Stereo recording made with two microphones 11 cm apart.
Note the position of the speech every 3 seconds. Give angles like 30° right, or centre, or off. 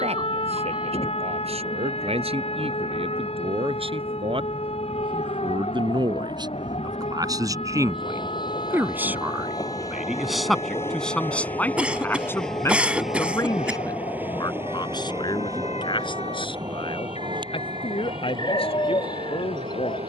60° right, 50° right, 30° right, centre, 30° left, 50° left, 60° left.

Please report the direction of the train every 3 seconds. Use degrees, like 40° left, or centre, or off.
60° left, 60° left, 50° left, 20° left, 10° right, 40° right, 50° right.